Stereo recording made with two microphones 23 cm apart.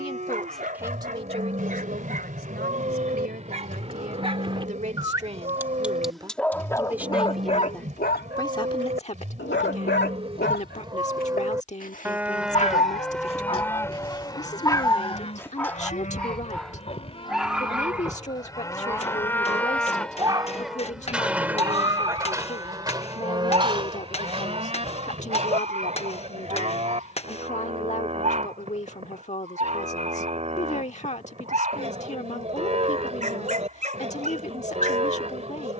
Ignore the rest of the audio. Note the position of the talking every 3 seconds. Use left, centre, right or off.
right, right, centre, left, left, left, left, left, left, left, left, left.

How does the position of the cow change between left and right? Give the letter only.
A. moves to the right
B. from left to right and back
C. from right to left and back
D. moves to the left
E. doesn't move
C.